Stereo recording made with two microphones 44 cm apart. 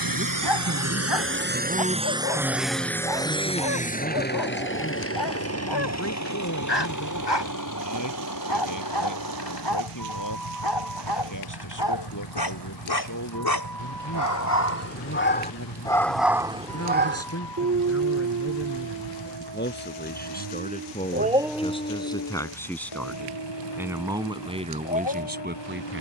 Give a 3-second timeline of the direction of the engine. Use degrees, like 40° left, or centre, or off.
20° right, 20° left, 40° left, 50° left, 50° left, 60° left, 60° left, 60° left, 60° left.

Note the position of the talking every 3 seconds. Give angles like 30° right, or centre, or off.
20° right, 20° left, 40° left, 40° left, 40° left, 30° left, 20° left, 10° left, 20° right.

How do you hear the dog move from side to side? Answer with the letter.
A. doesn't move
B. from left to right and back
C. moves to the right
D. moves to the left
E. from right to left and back
B.